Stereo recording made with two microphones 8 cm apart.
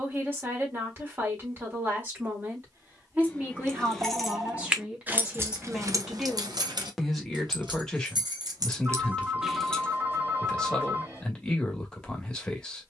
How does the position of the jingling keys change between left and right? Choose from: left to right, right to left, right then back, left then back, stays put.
right then back.